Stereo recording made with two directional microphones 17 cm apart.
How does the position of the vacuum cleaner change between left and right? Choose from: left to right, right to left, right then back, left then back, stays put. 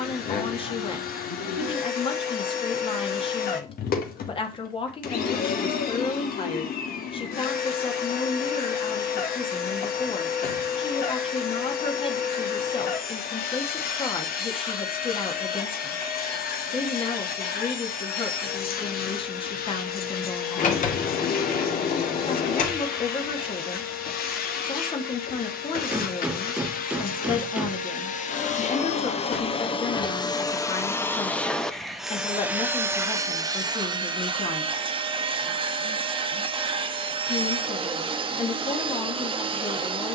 left to right.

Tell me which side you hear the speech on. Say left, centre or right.
left.